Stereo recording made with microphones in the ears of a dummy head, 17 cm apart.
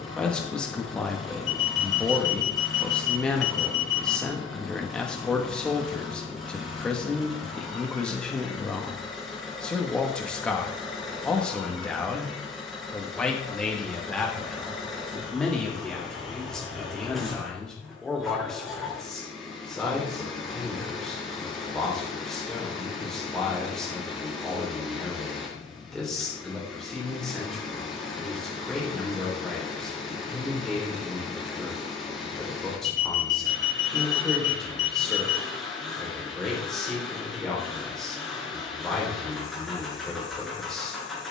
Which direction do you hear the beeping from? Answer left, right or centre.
left.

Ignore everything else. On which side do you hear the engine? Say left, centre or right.
centre.